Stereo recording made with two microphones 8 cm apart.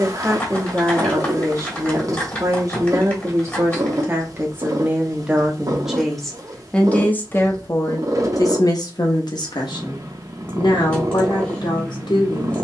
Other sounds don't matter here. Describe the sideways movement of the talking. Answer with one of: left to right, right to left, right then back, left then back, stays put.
right to left.